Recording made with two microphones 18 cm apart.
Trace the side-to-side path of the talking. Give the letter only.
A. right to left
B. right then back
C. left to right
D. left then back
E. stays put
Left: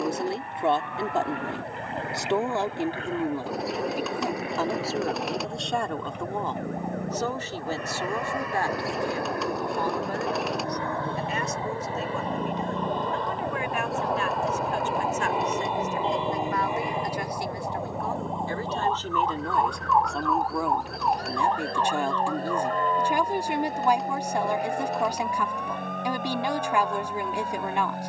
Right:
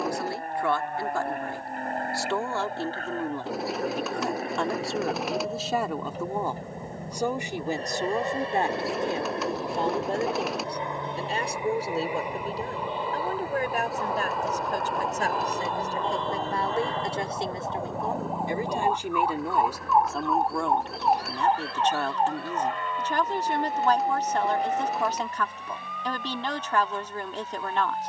B.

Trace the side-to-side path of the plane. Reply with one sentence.
You can hear the plane go from the right side to the left.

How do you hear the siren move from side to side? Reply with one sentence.
In this clip you hear the siren move from left to right.